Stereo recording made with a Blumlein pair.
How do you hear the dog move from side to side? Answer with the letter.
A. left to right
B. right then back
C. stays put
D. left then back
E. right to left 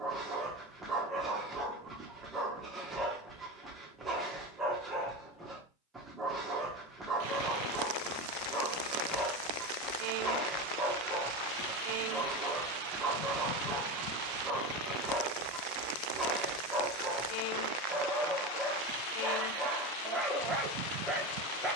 C.